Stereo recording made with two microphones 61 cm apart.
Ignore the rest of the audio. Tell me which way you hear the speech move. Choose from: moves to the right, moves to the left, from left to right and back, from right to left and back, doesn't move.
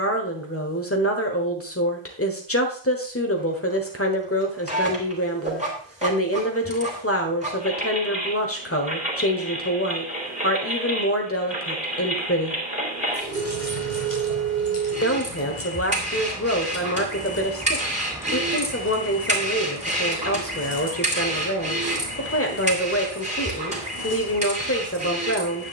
doesn't move.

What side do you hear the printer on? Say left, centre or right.
centre.